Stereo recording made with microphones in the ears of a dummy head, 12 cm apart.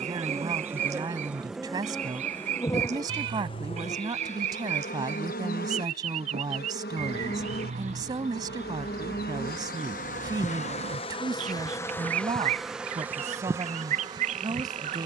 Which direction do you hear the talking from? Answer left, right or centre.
right.